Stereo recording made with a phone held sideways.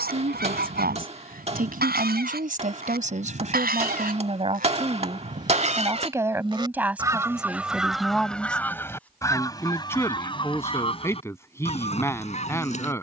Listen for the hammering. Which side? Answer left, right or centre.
right.